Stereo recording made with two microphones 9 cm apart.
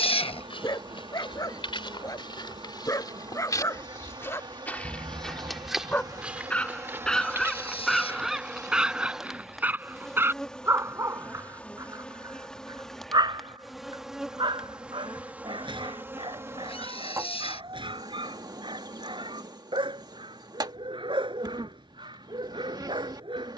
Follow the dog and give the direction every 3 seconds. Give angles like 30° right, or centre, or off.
40° left, 30° left, centre, 30° right, 50° right, 60° right, 60° right, 60° right.